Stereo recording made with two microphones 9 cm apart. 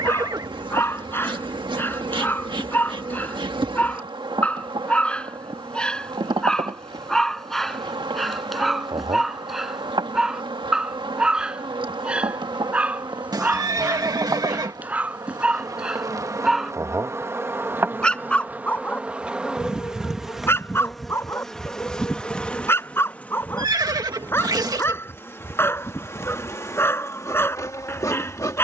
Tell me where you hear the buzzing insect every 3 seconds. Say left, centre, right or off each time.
right, right, right, right, right, right, centre, centre, left, left.